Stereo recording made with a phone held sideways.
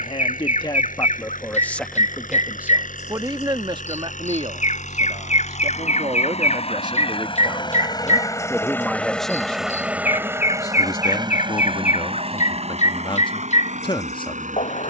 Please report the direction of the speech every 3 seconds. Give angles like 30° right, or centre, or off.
20° left, 40° right, 20° right, 20° left, 40° left.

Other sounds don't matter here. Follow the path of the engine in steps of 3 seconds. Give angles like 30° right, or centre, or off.
70° left, 60° left, 30° left, 20° right, 50° right.